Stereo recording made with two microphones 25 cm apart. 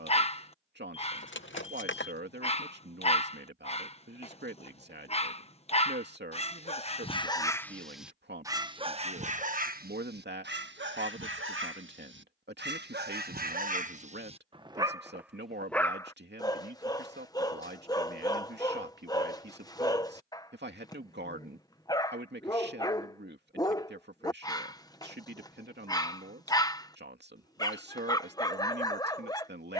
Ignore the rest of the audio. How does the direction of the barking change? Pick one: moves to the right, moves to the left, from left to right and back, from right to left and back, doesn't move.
from left to right and back.